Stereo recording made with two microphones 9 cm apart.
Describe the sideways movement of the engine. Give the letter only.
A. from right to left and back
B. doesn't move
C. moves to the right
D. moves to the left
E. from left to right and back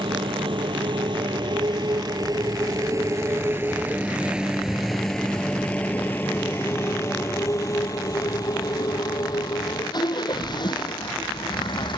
D.